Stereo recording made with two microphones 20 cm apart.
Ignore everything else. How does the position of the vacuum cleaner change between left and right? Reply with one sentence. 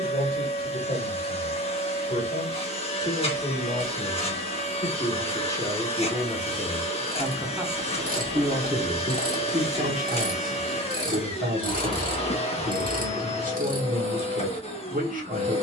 In this clip you hear the vacuum cleaner stay put.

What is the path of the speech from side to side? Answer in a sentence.
In this clip you hear the speech go from the left side to the right.